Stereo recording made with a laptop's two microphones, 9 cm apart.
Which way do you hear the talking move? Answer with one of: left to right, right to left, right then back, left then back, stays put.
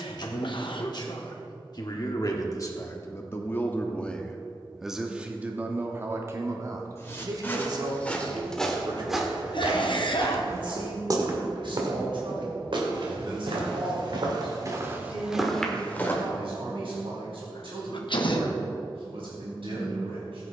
left to right.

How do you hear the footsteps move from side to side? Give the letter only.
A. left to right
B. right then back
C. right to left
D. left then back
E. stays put
B.